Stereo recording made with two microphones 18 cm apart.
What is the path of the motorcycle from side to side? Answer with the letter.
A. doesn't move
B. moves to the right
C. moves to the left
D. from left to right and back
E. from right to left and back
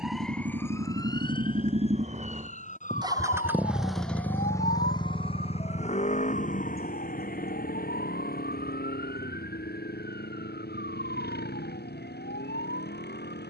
C.